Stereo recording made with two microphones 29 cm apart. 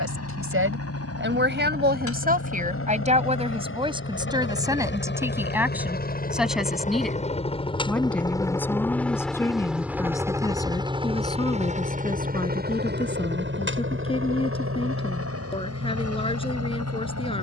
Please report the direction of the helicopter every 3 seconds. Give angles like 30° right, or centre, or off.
50° left, 40° left, 20° left, 10° right, 40° right, 50° right.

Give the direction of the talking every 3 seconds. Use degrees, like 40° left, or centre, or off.
40° right, 10° right, centre, 10° left, 20° left, 20° left.